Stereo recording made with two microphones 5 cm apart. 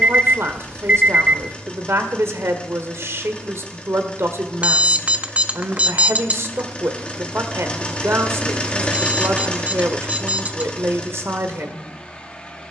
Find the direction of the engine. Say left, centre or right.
left.